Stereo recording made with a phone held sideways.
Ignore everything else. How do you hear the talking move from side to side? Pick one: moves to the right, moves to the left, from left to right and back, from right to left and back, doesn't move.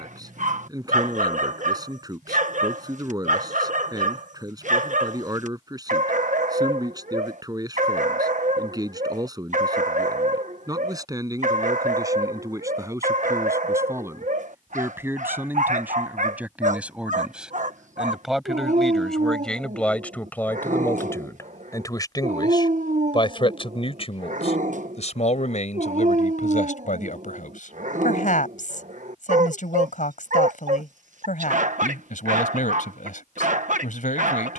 moves to the left.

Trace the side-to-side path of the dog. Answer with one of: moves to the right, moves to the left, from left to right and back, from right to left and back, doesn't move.
doesn't move.